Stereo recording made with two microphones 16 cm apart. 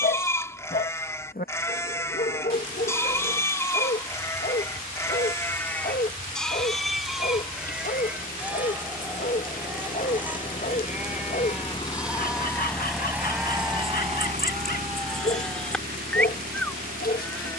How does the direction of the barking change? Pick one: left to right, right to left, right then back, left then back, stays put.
stays put.